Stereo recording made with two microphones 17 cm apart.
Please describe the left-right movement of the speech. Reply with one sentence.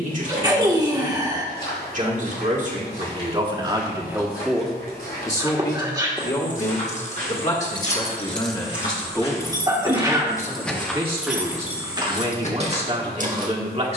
You can hear the speech move from right to left and back again.